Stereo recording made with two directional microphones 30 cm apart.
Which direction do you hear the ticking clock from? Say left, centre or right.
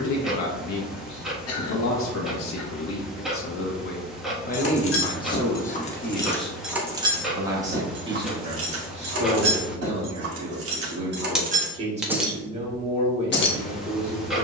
centre.